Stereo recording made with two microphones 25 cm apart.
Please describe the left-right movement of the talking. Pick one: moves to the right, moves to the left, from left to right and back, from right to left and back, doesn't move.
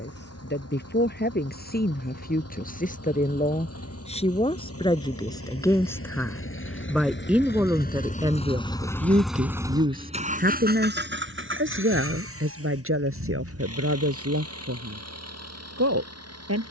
moves to the right.